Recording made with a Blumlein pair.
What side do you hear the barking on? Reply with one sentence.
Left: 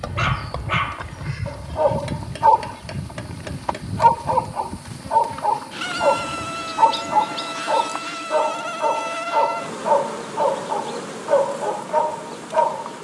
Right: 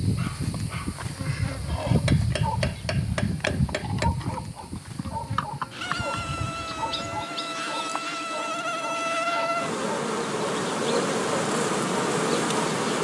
You can hear the barking on the left.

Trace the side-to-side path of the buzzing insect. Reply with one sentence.
You can hear the buzzing insect move from right to left and back again.